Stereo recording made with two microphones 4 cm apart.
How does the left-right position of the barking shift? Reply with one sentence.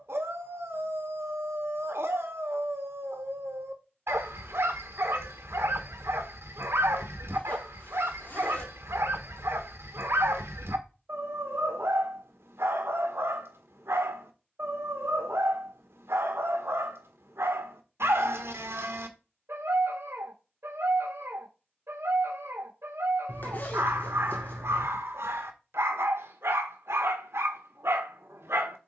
You can hear the barking stay in one place.